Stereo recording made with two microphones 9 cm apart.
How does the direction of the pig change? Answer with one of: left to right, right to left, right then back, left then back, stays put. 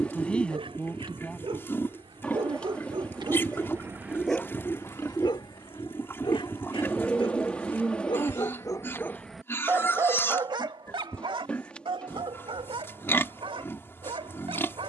stays put.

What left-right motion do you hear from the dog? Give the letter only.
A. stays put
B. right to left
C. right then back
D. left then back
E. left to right
D.